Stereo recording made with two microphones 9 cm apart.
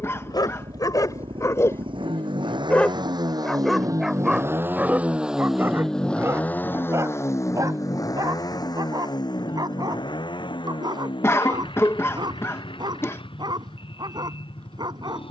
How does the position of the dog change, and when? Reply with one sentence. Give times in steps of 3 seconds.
In this clip you hear the dog on the left from 0 s, in the centre from 3 s and on the right from 6 s.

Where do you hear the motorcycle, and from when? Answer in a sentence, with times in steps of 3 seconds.
In this clip you hear the motorcycle on the right from 0 s and on the left from 6 s.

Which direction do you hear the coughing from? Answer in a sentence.
In this clip you hear the coughing on the left.